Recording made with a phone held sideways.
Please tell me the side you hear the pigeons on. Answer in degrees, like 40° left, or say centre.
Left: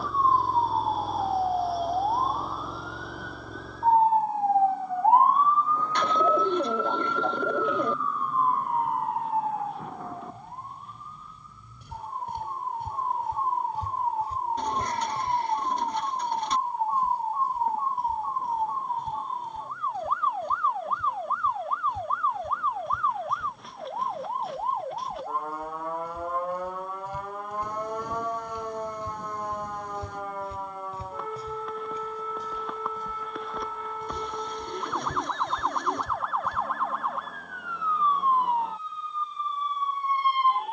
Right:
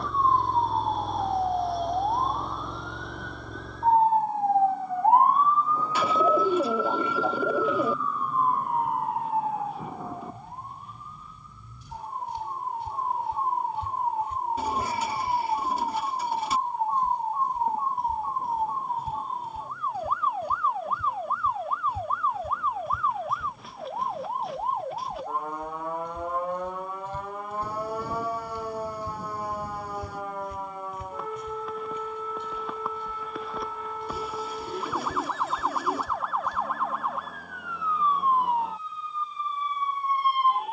10° right.